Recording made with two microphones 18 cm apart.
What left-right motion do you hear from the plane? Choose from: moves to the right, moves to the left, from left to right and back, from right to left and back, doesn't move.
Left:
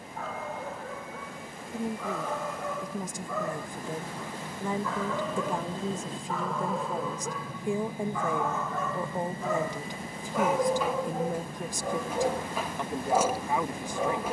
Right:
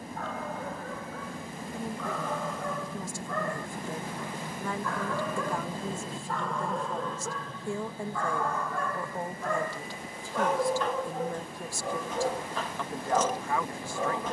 moves to the left.